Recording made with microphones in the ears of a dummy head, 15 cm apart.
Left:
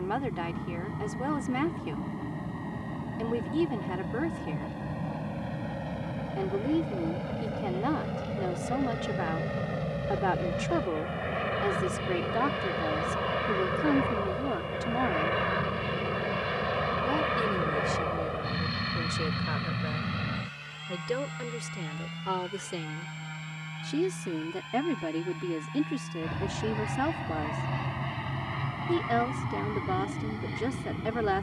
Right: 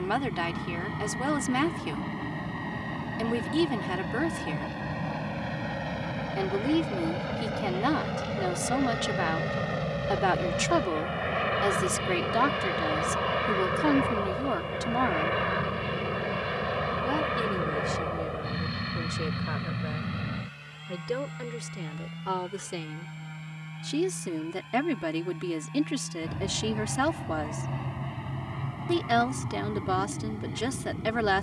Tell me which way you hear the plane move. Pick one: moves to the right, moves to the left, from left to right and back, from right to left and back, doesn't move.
moves to the left.